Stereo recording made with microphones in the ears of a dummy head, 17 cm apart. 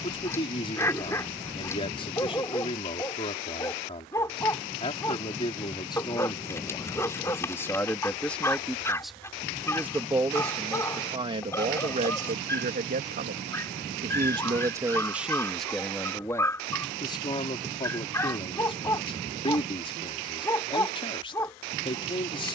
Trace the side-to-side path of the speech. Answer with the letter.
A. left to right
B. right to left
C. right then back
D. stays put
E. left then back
C.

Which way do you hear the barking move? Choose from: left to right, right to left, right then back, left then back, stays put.
stays put.